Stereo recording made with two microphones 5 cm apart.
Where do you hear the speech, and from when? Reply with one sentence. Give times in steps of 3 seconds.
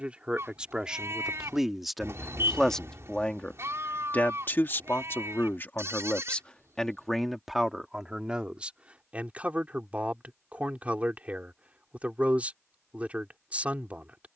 In this clip you hear the speech in the centre from 0 s, on the left from 3 s, in the centre from 6 s and on the right from 9 s.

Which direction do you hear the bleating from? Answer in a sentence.
You can hear the bleating on the right.